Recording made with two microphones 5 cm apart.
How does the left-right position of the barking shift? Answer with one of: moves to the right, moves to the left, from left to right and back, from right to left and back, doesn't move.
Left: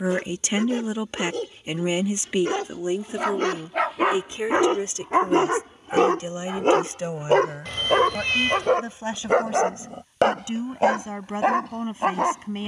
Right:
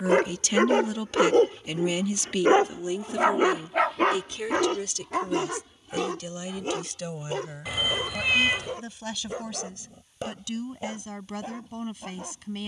moves to the left.